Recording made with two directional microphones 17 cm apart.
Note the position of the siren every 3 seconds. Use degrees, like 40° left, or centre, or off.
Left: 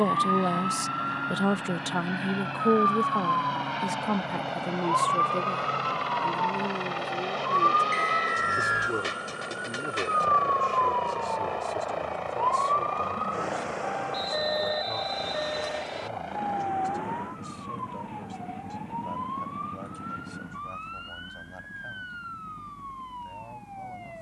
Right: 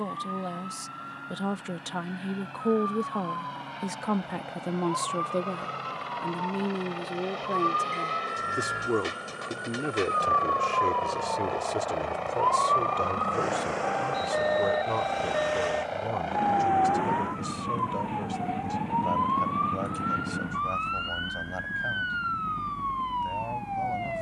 50° left, 40° left, 30° left, 10° left, 10° right, 30° right, 50° right, 50° right.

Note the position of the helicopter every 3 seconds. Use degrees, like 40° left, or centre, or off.
60° left, 40° left, 30° left, 10° left, 10° right, 30° right, 40° right, 50° right.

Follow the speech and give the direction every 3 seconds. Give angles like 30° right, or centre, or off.
30° left, 10° right, 30° right, 40° right, 40° right, 50° right, 50° right, 50° right.